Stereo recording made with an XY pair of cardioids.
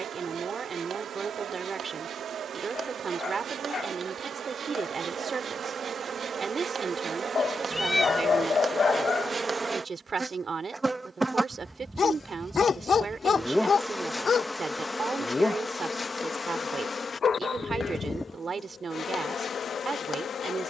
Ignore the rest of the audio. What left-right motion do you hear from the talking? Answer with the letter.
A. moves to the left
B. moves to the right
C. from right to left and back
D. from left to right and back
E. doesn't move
E.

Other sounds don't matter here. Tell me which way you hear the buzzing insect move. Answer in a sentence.
You can hear the buzzing insect go from the right side to the left.